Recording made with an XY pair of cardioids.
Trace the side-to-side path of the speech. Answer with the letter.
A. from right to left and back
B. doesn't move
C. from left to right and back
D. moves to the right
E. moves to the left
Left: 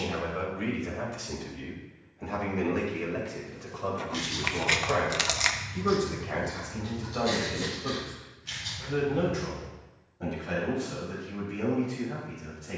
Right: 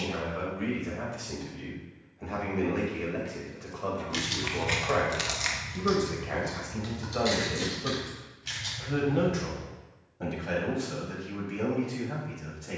D.